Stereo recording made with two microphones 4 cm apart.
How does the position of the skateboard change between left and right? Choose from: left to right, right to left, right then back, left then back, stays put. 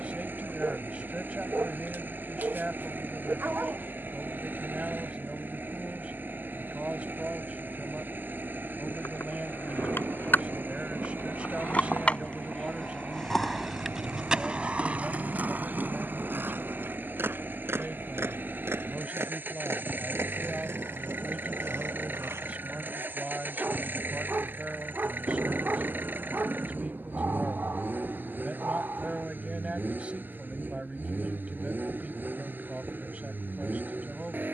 left to right.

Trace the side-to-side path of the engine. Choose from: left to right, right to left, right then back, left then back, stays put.
stays put.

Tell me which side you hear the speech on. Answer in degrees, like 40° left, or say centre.
30° right.